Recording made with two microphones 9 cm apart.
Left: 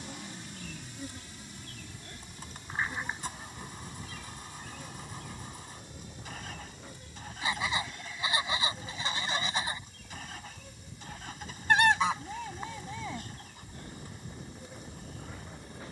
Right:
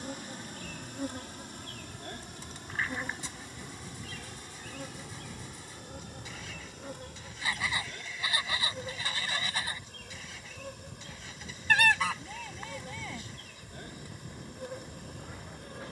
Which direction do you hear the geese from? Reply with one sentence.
In this clip you hear the geese on the left.